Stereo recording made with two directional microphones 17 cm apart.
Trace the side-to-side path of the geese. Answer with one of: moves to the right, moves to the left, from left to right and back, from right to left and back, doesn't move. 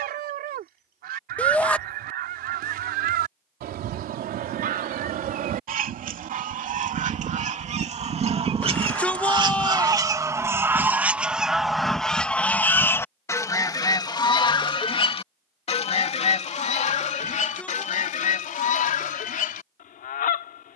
moves to the left.